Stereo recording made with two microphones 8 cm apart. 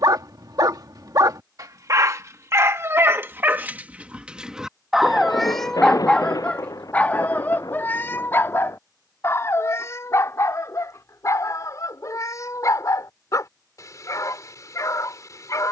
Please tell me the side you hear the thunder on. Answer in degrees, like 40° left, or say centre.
50° left.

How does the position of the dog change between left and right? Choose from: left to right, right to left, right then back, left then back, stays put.
right to left.